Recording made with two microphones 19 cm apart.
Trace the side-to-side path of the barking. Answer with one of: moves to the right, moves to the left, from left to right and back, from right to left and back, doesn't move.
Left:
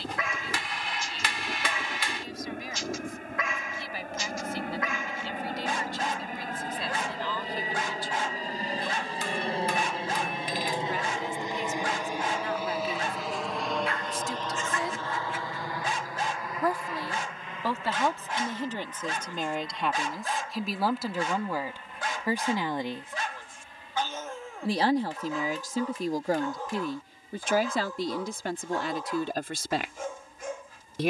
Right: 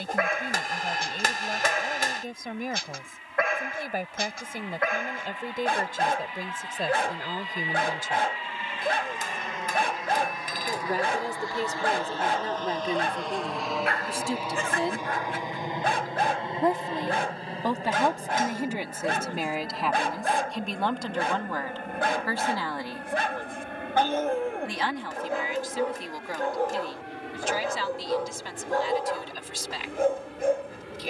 doesn't move.